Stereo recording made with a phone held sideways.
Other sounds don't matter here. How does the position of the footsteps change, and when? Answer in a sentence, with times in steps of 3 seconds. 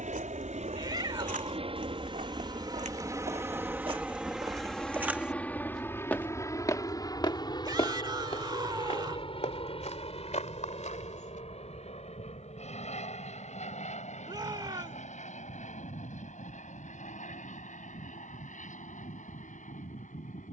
You can hear the footsteps on the right from 0 s, on the left from 6 s and not at all from 12 s.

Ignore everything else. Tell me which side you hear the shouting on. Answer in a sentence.
You can hear the shouting on the right.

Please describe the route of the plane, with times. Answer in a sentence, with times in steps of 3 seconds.
You can hear the plane on the right from 0 s, in the centre from 3 s and on the left from 6 s.